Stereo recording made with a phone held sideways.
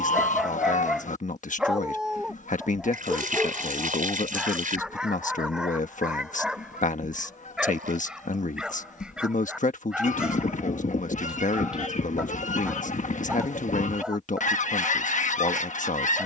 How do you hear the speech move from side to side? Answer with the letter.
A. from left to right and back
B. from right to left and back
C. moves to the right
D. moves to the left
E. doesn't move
E.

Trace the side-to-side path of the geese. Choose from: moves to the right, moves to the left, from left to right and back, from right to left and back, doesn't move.
doesn't move.